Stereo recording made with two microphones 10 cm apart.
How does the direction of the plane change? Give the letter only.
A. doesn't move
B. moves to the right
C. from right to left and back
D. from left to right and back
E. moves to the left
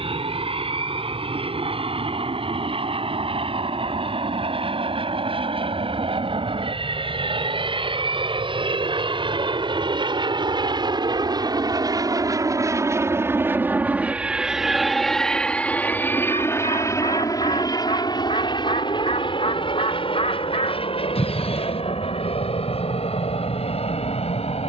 E.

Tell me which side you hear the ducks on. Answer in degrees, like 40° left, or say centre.
70° left.